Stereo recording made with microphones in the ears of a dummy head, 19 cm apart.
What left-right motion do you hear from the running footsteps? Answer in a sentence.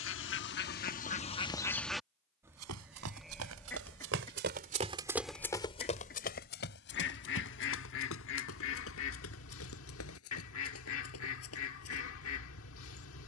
In this clip you hear the running footsteps move from right to left.